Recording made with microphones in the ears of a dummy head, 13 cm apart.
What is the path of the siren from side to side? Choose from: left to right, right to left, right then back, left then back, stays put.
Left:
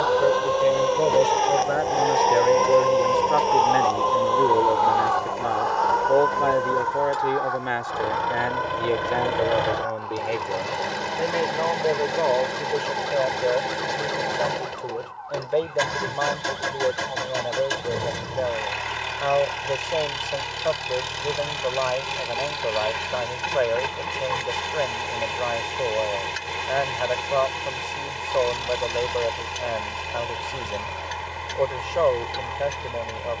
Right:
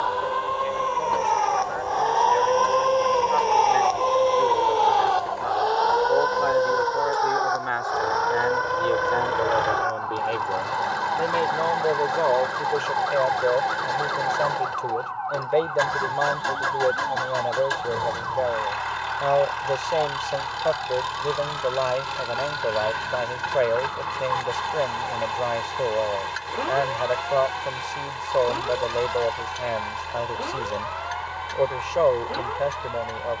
left to right.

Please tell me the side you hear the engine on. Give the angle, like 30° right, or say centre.
20° left.